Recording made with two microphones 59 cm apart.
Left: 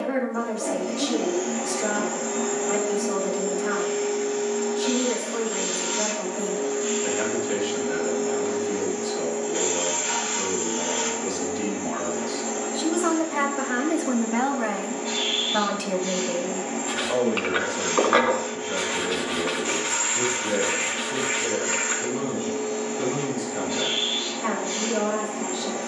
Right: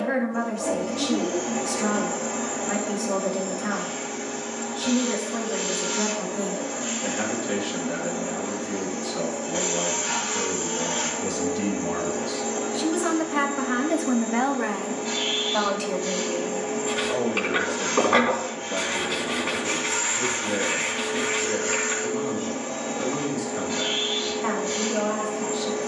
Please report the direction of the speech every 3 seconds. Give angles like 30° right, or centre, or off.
80° right, 80° right, 80° right, 70° right, 30° right, 50° left, 70° left, 70° left, 70° left.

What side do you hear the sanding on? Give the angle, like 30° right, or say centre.
60° right.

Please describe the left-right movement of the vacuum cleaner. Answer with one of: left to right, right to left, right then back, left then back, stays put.
stays put.